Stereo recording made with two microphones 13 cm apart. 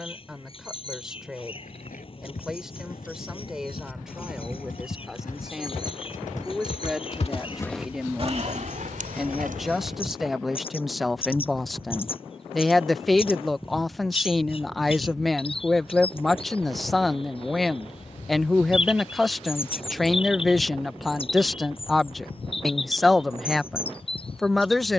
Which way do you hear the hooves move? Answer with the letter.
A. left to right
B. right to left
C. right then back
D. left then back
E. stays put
A.